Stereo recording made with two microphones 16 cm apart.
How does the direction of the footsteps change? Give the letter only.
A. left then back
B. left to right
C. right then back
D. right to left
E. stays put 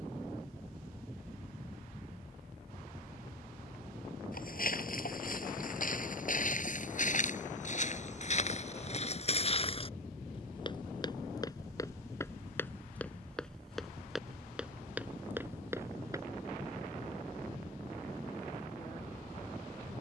B.